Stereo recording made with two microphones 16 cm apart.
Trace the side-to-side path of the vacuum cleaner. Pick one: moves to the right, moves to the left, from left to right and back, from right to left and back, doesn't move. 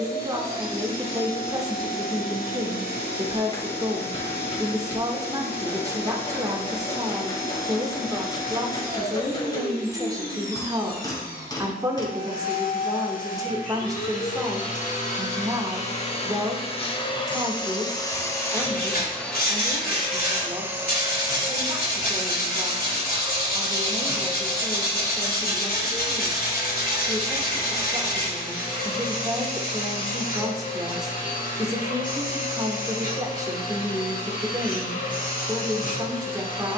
from left to right and back.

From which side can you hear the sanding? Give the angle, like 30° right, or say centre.
70° left.